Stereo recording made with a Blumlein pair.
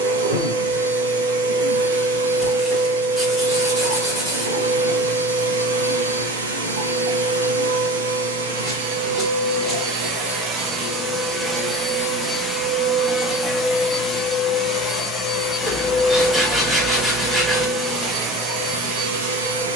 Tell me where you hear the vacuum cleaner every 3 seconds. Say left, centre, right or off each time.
right, right, right, right, centre, centre, right.